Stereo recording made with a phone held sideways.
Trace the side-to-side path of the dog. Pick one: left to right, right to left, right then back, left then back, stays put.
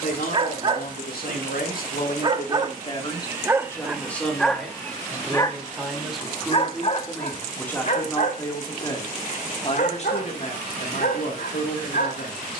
right to left.